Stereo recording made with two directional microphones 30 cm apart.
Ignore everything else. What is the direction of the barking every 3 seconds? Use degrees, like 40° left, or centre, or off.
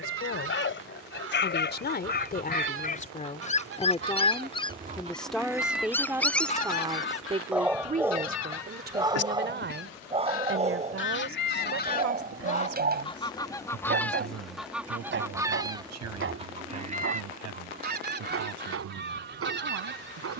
40° left, 20° left, centre, 20° right, 30° right, 40° right, 50° right.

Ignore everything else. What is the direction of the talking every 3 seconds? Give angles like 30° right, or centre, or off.
30° left, 10° left, 20° right, 40° right, 60° right, 60° right, 70° right.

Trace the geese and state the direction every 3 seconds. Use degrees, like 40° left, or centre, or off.
50° right, 30° right, 40° left, 40° left, 10° left, 20° right, 40° right.